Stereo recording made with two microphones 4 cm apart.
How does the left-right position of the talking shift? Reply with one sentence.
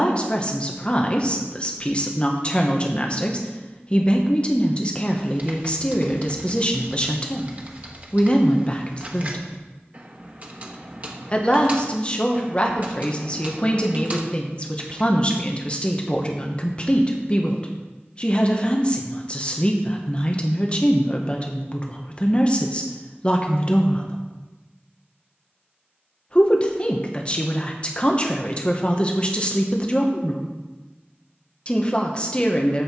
In this clip you hear the talking stay put.